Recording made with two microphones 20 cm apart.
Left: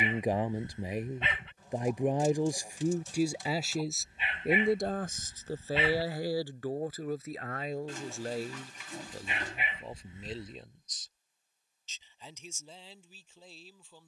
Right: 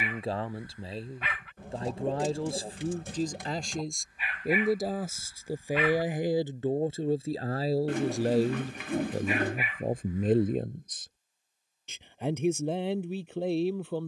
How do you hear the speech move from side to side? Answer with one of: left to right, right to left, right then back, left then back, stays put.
left to right.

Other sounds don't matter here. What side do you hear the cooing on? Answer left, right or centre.
right.